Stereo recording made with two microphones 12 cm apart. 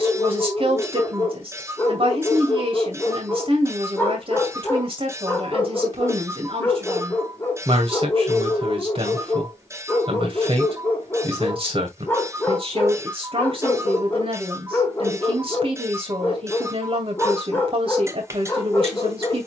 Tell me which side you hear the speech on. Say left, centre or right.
right.